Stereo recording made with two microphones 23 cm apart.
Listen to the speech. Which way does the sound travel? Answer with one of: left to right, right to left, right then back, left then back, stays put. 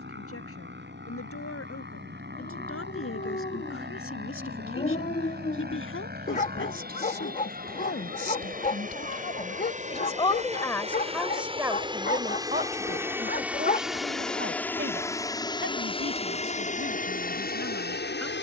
left to right.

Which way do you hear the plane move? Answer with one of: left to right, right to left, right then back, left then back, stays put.
right to left.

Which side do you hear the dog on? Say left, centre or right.
left.